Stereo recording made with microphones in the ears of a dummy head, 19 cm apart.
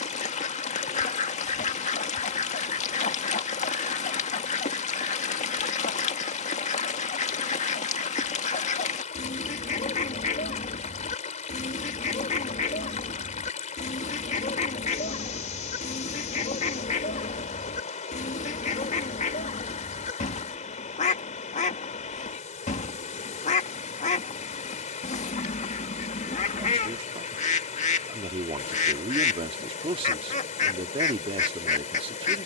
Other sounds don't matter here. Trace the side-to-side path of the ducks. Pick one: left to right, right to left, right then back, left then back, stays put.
stays put.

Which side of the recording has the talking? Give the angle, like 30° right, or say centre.
30° right.